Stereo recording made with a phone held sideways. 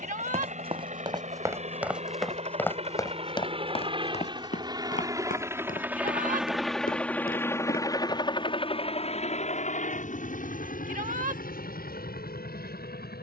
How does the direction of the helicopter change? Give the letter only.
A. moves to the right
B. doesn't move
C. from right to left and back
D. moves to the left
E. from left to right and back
D.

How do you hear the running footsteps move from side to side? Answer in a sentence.
You can hear the running footsteps travel towards the left.